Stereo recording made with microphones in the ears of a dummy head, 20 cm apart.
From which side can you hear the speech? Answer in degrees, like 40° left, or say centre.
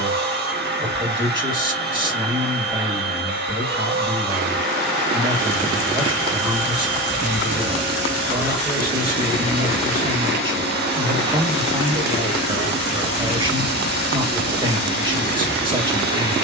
20° right.